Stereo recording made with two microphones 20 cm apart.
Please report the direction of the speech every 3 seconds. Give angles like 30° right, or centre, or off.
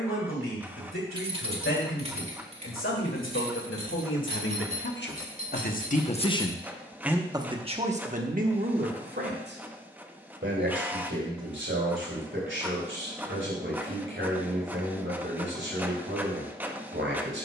80° left, 60° left, 20° right, 60° right, 70° right, 70° right.